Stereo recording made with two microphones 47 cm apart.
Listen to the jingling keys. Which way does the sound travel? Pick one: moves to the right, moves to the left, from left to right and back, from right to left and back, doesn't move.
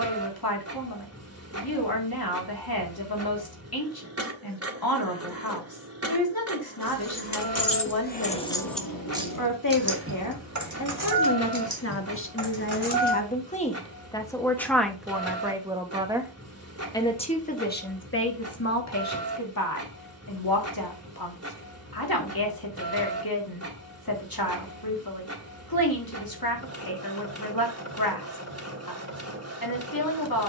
moves to the right.